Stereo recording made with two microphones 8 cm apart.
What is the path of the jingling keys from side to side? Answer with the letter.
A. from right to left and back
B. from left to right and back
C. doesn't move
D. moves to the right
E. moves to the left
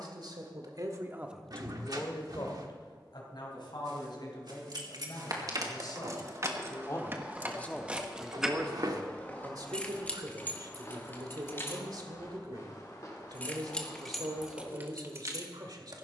A.